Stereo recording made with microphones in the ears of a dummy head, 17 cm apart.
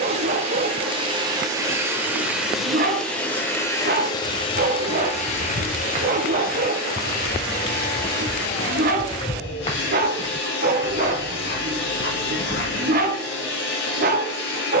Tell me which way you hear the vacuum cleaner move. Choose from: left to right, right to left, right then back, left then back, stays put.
right to left.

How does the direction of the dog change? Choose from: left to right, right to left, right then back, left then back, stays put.
stays put.